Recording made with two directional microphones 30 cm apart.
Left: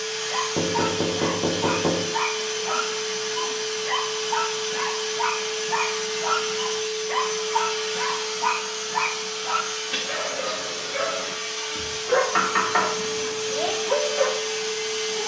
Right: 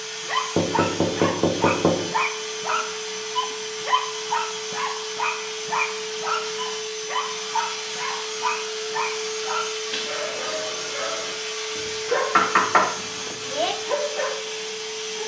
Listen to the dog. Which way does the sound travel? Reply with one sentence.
In this clip you hear the dog travel towards the left.